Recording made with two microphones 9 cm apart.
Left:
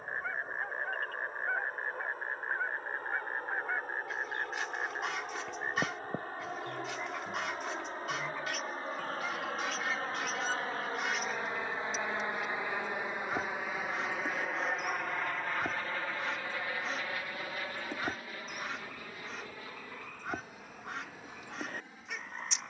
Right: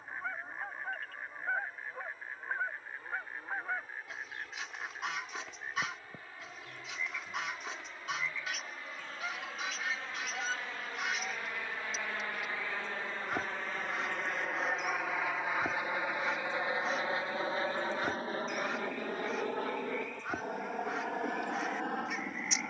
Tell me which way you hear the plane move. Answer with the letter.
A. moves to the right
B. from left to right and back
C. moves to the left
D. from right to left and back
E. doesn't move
A.